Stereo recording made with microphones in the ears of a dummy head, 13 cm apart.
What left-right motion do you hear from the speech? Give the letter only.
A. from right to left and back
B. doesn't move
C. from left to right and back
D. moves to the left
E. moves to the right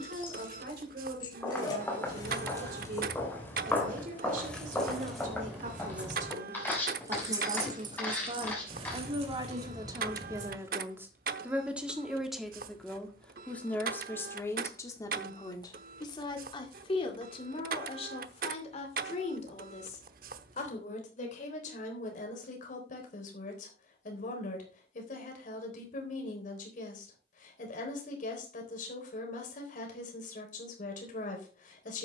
D.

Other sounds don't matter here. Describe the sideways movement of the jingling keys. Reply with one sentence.
You can hear the jingling keys travel towards the right.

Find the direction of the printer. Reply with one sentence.
In this clip you hear the printer on the right.